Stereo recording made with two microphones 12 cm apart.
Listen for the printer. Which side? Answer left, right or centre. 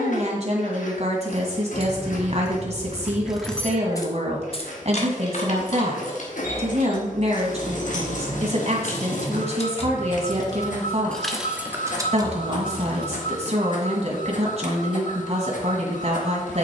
left.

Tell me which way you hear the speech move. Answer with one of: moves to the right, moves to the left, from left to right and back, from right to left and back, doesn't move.
doesn't move.